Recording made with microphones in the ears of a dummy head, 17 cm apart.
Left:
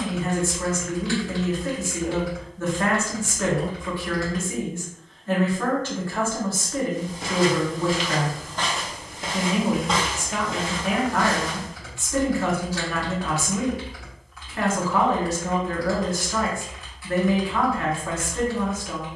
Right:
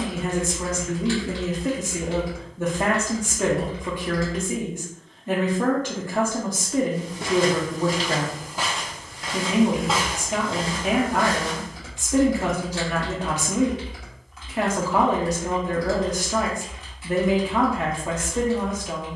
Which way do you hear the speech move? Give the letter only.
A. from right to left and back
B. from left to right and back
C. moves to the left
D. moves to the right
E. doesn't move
E.